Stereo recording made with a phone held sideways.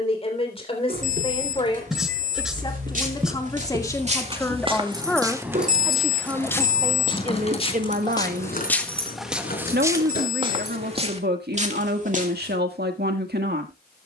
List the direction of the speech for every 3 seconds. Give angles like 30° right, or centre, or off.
30° left, 10° left, 40° right, 80° right, 80° right.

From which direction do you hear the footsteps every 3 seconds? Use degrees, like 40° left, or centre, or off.
60° right, 30° right, 20° left, 30° right, 50° right.